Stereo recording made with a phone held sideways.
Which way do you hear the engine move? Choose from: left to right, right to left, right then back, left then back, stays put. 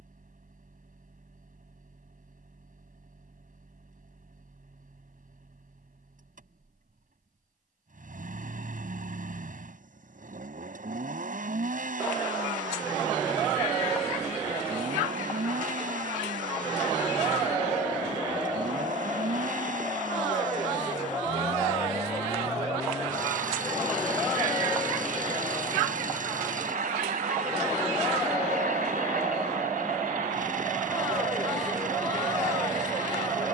stays put.